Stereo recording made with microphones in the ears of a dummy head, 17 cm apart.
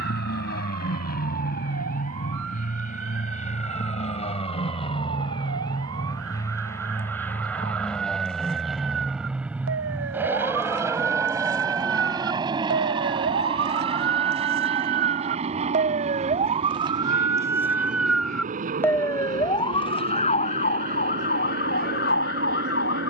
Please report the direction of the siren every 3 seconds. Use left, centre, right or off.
right, right, right, right, right, right, left, left.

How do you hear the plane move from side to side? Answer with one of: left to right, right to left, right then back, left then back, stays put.
left to right.